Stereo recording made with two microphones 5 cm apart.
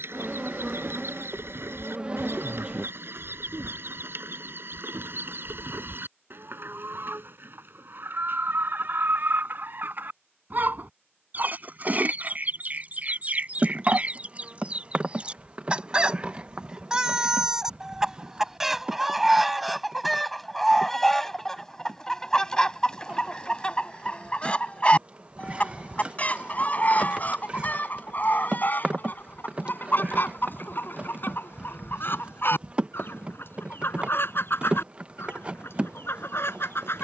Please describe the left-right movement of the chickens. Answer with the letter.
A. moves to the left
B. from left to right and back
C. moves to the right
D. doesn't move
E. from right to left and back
A.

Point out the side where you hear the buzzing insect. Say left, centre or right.
right.